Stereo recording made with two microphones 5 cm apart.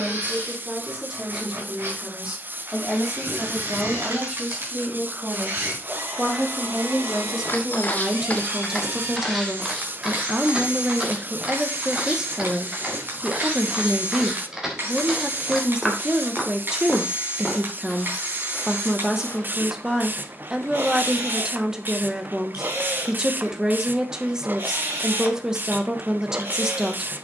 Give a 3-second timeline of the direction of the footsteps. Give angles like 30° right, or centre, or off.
off, off, 30° left, 10° right, 10° right, 10° left, 30° left, off, off.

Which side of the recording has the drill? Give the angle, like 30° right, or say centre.
40° right.